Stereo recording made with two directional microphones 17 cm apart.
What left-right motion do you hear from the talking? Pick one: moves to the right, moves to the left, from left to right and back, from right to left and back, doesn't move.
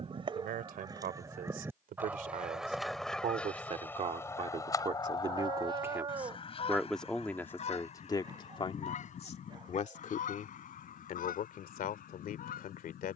moves to the left.